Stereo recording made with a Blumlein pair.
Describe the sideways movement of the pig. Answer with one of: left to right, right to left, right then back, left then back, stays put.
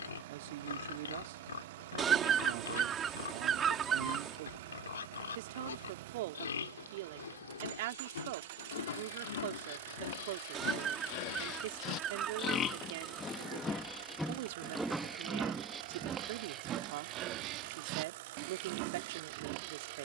left to right.